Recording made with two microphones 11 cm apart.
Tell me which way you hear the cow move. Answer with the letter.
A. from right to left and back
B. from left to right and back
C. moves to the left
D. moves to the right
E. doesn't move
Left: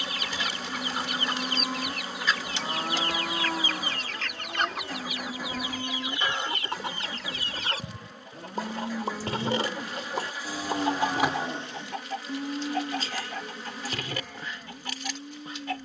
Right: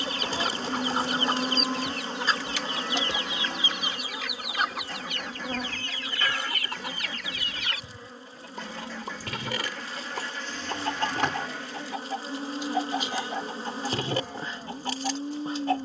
A.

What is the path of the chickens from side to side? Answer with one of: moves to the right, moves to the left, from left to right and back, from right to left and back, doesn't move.
from right to left and back.